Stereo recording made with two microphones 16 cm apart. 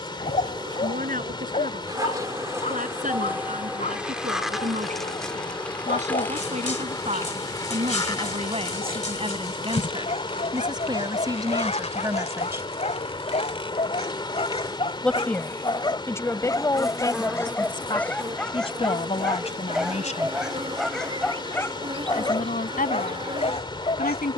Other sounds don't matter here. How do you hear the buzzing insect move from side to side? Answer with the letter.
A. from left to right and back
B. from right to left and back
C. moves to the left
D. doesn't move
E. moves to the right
B.